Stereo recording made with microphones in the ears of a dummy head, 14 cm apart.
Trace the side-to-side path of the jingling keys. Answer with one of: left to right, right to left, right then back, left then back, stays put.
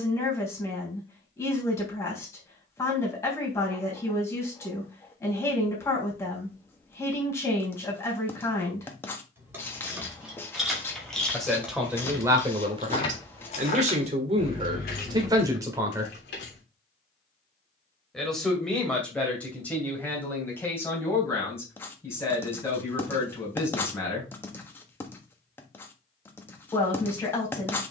right to left.